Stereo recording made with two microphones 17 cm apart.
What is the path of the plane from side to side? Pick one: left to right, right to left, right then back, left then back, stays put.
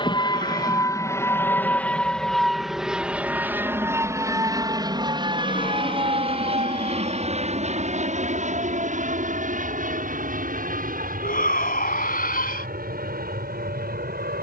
left to right.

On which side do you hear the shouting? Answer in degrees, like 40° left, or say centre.
60° left.